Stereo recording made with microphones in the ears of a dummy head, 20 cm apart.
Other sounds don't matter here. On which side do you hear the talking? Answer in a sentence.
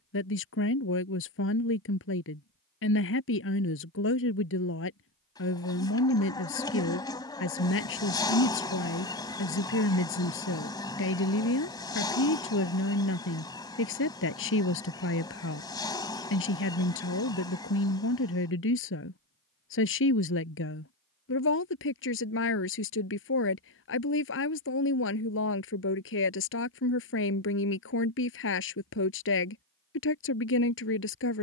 You can hear the talking on the left.